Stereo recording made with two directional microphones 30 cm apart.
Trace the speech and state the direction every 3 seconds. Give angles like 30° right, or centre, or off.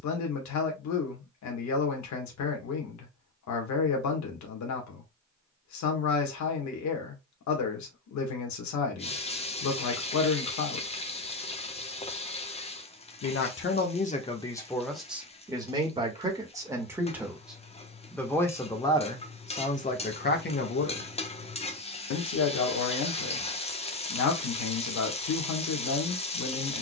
70° left, 70° left, 70° left, 70° left, 20° left, 10° right, 20° left, 60° left, 70° left.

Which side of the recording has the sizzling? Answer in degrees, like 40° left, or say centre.
20° left.